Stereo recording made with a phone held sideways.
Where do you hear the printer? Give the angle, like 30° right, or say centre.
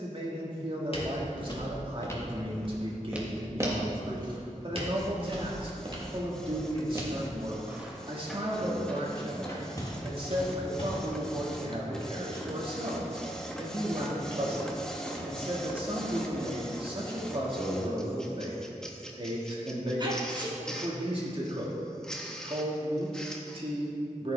centre.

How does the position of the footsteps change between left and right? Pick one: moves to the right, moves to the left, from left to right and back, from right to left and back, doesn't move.
from left to right and back.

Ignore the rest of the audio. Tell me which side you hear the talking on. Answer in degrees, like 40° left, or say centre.
40° right.